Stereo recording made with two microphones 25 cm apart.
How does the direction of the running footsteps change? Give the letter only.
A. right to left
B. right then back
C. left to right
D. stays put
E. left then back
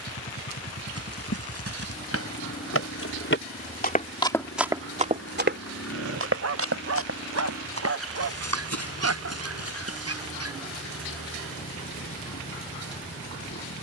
C.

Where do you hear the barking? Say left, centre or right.
right.